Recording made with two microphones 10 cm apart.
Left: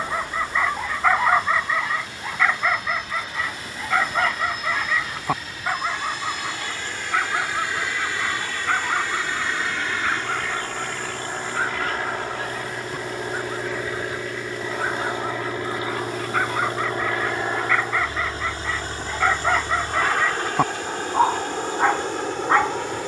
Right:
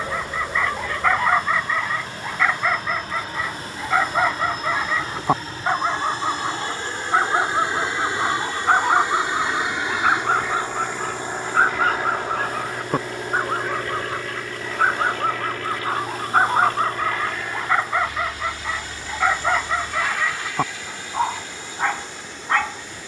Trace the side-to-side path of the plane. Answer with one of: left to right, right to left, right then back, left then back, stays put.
right to left.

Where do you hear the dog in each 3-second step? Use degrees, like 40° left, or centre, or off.
centre, 10° right, 30° right, 40° right, 50° right, 40° right, centre, 20° left.